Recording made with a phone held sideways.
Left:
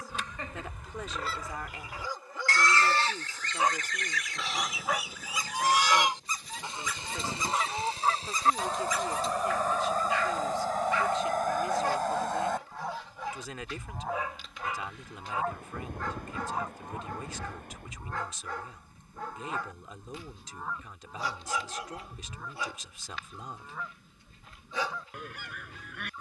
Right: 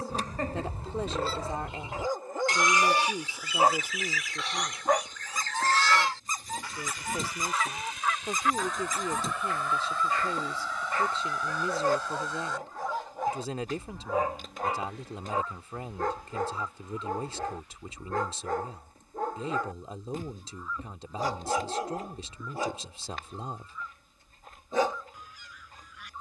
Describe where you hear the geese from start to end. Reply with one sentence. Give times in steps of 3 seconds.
In this clip you hear the geese on the right from 0 s, in the centre from 3 s and on the left from 6 s.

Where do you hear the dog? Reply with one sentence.
In this clip you hear the dog on the right.